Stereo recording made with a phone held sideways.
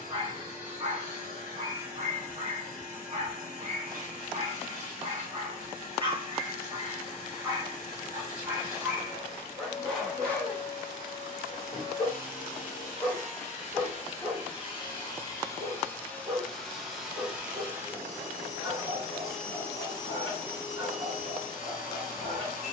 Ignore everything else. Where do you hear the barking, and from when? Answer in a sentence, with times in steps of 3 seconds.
You can hear the barking on the right from 0 s, in the centre from 9 s and on the right from 15 s.